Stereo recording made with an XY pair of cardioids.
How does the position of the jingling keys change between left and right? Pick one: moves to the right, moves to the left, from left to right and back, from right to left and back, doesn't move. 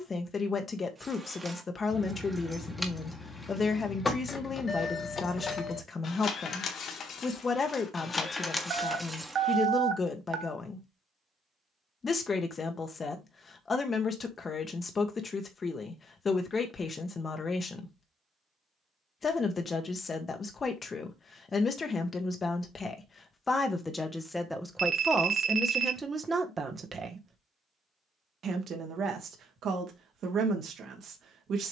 from right to left and back.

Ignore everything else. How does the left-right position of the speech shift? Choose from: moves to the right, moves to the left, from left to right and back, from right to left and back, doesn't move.
moves to the right.